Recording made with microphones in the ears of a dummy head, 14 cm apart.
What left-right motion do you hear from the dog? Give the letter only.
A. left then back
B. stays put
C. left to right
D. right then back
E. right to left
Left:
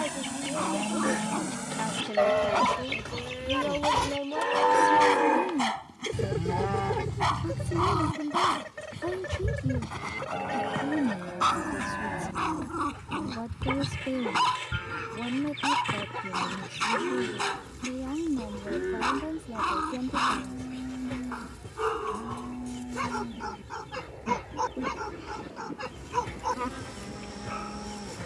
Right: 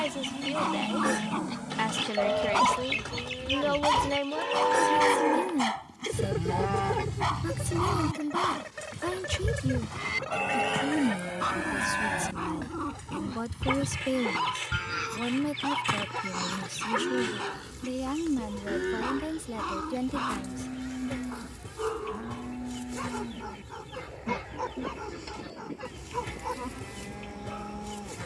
E.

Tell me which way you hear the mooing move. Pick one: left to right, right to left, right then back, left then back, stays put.
left to right.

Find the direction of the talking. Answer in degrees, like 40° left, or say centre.
60° right.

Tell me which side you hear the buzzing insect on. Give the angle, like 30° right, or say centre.
50° left.